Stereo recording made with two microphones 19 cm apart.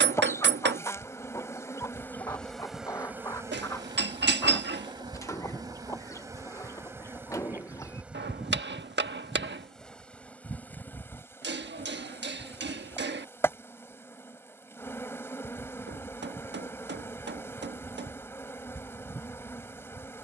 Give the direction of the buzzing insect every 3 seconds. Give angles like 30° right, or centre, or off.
10° left, 20° right, 10° right, 10° left, 10° left, 10° left, 10° left.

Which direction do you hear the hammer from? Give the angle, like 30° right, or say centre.
70° right.